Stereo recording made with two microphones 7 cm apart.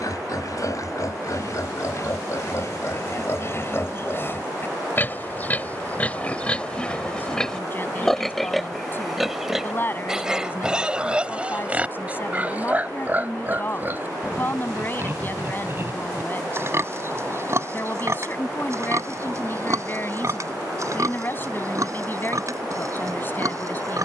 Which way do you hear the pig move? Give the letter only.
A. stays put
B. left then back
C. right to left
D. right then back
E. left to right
E.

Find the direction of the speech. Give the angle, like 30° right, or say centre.
30° left.